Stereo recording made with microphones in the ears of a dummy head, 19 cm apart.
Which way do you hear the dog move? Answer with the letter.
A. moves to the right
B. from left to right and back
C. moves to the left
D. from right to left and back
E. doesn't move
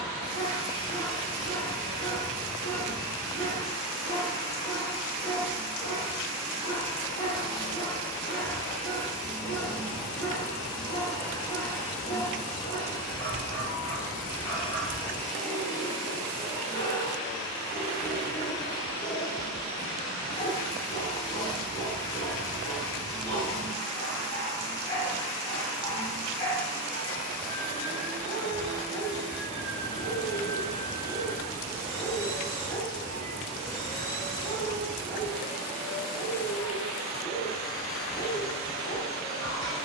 E.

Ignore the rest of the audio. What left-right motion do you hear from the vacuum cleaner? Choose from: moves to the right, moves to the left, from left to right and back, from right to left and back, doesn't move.
doesn't move.